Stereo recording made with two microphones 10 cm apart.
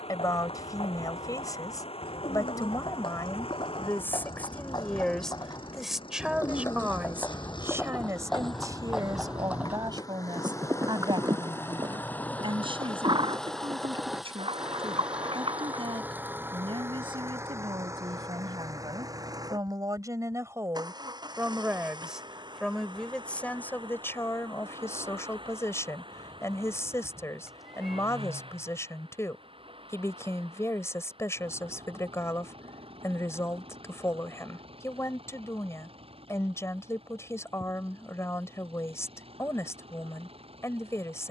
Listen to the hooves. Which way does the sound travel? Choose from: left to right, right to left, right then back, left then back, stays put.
left to right.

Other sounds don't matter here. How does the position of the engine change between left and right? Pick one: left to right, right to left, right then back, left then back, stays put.
left to right.